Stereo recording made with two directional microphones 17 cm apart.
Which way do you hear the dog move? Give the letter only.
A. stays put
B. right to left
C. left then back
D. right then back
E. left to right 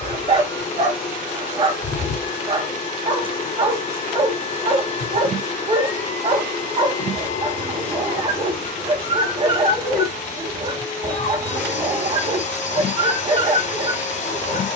A.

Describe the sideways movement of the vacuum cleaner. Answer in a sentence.
In this clip you hear the vacuum cleaner stay in one place.